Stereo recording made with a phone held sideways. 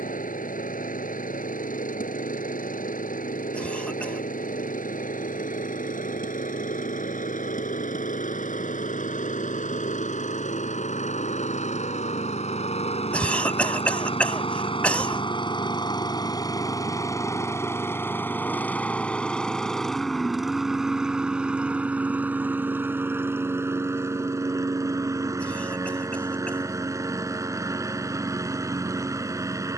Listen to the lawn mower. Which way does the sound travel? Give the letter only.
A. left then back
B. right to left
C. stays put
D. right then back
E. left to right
E.